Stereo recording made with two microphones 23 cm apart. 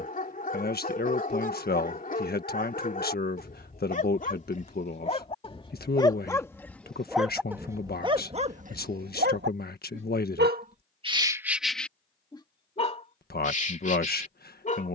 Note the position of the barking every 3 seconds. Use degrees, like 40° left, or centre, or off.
40° left, 30° left, 10° right, 30° right, 30° left.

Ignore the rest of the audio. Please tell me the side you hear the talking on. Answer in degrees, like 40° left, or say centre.
40° left.